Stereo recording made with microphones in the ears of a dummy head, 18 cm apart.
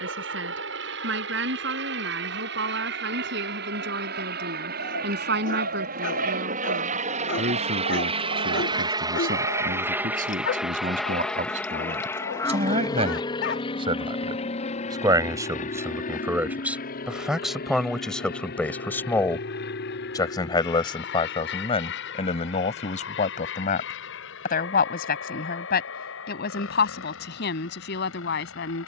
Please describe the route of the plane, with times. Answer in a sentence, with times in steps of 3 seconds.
You can hear the plane on the right from 0 s, in the centre from 9 s and on the left from 12 s.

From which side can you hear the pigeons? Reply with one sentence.
You can hear the pigeons on the right.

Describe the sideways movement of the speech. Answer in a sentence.
In this clip you hear the speech go from the right side to the left.